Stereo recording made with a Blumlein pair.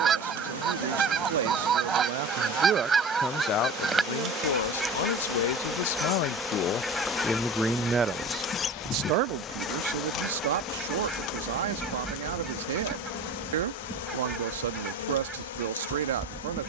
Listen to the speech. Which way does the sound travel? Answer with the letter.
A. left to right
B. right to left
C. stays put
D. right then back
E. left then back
E.